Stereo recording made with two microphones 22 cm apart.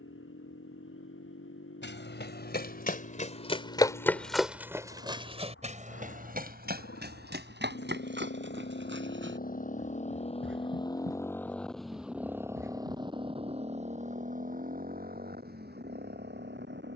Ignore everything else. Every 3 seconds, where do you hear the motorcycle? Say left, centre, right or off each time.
left, left, left, left, right, right.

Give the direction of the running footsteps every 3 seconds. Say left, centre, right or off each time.
left, centre, right, right, right, off.